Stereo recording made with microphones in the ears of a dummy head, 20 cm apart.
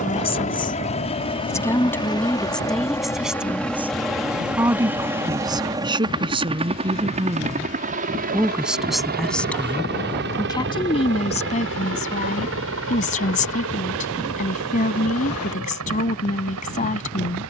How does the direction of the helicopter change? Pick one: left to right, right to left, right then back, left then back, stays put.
left to right.